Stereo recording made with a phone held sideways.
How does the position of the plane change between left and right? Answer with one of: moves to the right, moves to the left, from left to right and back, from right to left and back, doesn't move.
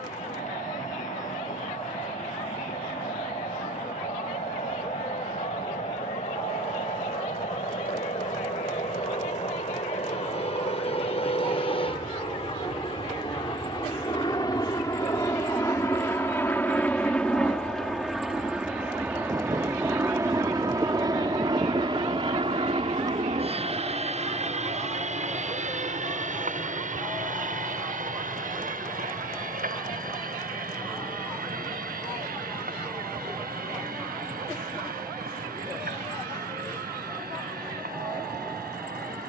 moves to the right.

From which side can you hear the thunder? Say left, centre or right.
right.